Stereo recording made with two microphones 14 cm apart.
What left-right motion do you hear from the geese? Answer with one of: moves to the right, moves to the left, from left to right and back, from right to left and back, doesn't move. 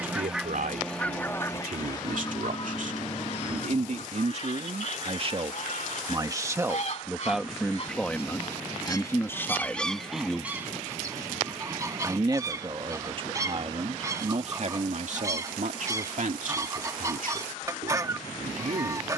from right to left and back.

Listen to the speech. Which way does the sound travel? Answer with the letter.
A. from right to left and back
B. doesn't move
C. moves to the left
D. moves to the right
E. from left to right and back
A.